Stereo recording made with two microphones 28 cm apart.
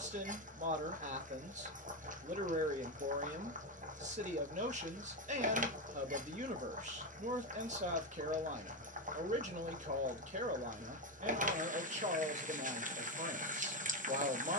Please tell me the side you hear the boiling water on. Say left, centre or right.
right.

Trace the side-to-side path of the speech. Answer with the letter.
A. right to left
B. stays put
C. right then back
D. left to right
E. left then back
B.